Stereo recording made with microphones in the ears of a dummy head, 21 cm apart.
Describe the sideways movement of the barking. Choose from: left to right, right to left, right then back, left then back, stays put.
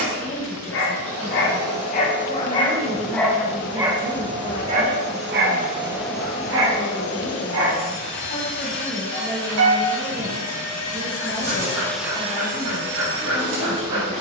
left to right.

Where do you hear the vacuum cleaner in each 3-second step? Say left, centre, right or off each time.
right, right, left, left, right.